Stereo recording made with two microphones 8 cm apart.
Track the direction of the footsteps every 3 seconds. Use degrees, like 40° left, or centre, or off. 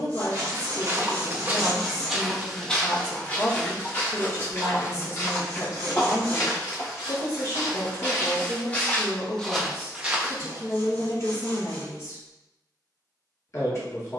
20° right, 30° left, 40° left, 10° right, off.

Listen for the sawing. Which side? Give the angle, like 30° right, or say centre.
60° right.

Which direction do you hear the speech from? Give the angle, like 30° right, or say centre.
40° left.